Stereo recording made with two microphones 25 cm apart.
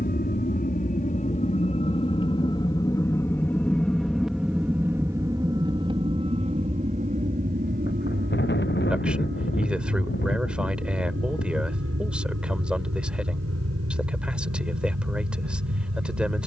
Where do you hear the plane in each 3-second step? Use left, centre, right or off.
left, centre, right, right, right, right.